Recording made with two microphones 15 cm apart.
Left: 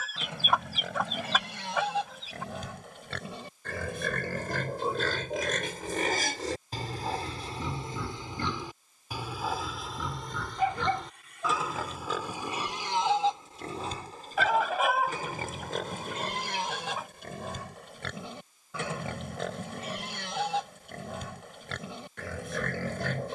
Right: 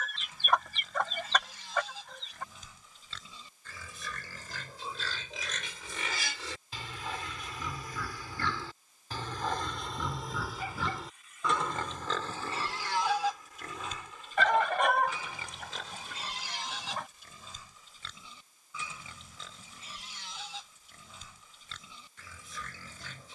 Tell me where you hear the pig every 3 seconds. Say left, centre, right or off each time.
left, left, left, centre, left, left, left, left.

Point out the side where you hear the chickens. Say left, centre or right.
centre.